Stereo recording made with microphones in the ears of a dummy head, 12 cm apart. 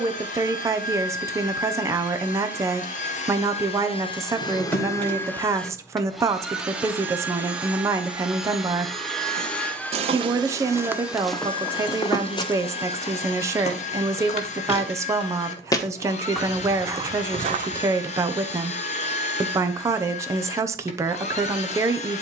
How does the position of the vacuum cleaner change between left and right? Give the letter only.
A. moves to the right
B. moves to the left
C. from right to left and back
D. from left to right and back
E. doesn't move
D.